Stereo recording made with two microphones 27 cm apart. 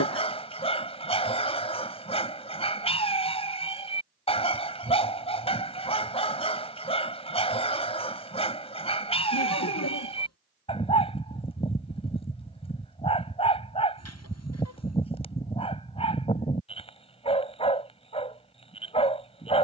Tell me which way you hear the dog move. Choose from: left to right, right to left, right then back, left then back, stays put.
stays put.